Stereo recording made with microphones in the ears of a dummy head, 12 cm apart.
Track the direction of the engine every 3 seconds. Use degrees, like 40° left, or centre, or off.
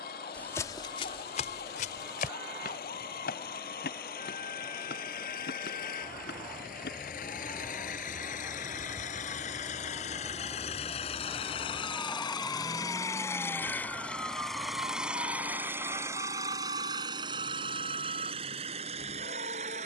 80° left, 70° left, 60° left, 50° left, 20° left, 20° right, 50° right.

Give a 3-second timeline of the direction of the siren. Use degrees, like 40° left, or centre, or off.
60° left, 50° left, 40° left, 20° left, 10° right, 40° right, 50° right.